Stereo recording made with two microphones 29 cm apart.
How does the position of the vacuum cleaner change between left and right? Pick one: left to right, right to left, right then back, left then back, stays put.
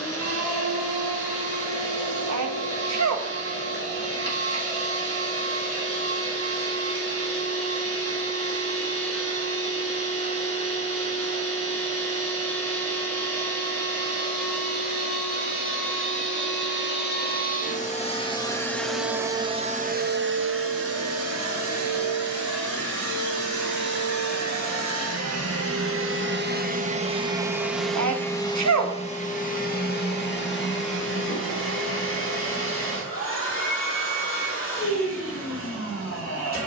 right then back.